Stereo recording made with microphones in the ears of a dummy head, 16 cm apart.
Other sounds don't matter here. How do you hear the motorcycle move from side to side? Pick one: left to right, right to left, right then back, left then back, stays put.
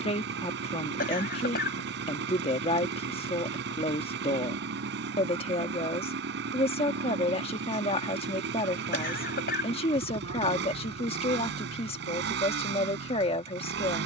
stays put.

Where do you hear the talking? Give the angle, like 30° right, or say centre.
30° left.